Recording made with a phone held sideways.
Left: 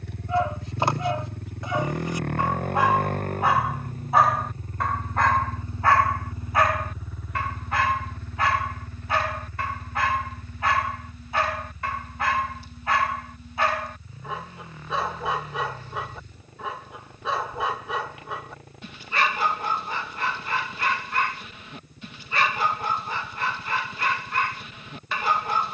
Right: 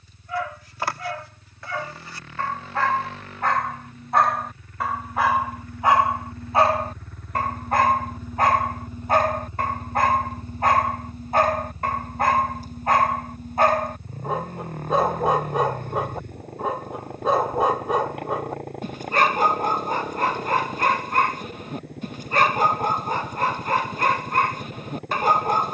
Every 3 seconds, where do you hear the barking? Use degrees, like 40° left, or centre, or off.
20° left, centre, 40° right, 40° right, 40° right, 40° right, 40° right, 40° right, 40° right.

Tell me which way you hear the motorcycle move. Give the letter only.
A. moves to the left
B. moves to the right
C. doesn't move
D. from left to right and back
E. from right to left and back
B.